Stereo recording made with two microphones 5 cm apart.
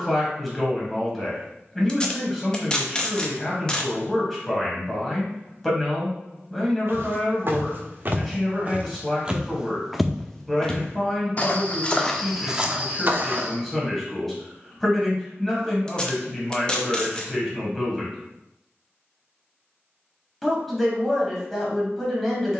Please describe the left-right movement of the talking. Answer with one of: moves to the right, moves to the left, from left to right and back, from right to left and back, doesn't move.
doesn't move.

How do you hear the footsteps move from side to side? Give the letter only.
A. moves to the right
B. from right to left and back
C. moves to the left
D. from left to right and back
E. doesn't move
B.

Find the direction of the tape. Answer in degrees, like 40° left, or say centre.
20° left.